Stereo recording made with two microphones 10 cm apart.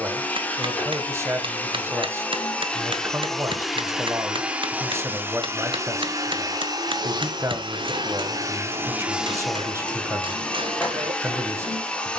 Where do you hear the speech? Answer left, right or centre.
right.